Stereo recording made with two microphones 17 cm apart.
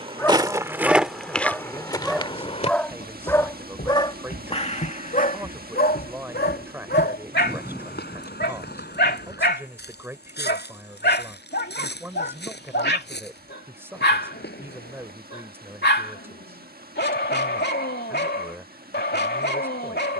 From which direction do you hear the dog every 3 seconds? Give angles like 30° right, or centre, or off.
centre, 40° left, 80° left, 80° left, 80° left, 80° left, 80° left.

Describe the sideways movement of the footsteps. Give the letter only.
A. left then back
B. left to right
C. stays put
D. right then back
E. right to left
E.